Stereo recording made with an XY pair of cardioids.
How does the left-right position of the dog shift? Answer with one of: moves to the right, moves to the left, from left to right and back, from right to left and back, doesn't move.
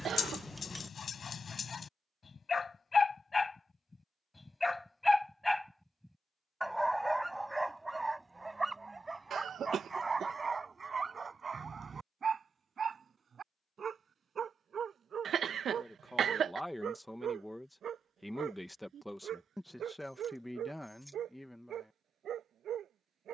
moves to the right.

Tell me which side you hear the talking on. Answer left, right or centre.
centre.